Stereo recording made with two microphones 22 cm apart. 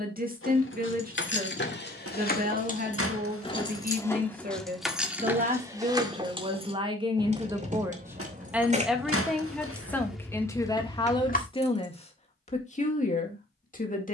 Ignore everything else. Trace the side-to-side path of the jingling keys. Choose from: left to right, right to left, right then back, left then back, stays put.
right then back.